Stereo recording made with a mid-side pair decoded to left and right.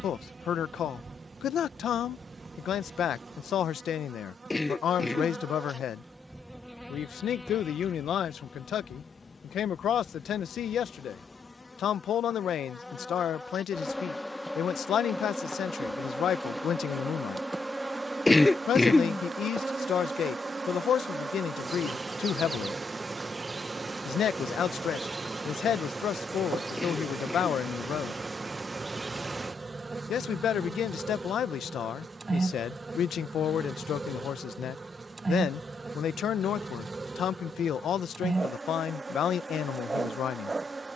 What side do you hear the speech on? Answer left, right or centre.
left.